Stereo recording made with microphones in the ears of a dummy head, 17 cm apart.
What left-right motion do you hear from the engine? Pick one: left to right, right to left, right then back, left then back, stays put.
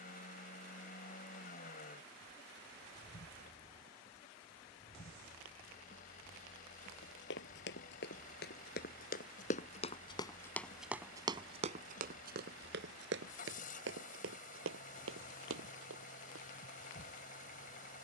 stays put.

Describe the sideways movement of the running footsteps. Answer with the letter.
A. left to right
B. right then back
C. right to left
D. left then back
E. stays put
A.